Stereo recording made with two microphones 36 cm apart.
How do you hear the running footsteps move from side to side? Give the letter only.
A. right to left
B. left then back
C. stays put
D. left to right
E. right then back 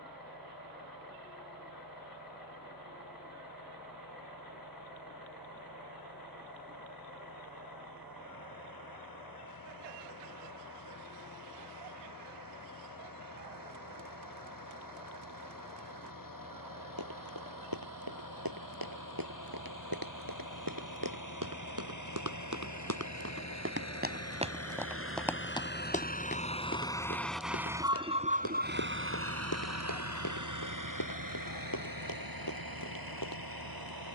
A.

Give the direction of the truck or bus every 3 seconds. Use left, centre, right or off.
left, left, left, left, left, left, left, left, left, right, right, right.